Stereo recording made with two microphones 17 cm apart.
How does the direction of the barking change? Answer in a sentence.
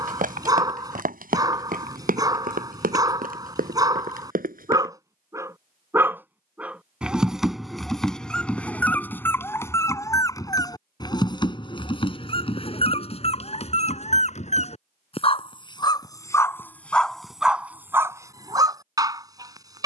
In this clip you hear the barking go left and come back.